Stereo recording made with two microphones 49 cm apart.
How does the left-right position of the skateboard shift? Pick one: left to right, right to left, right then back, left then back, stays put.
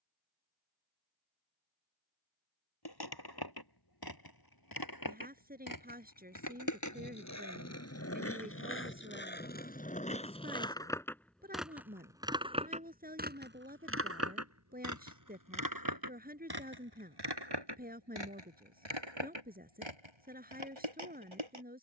left to right.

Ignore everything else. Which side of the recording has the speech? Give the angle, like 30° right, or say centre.
20° right.